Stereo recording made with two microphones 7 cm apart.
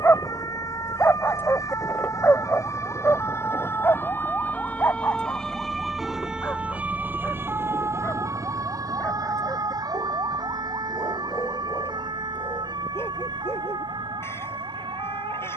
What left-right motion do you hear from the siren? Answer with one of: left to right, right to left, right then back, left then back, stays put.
left to right.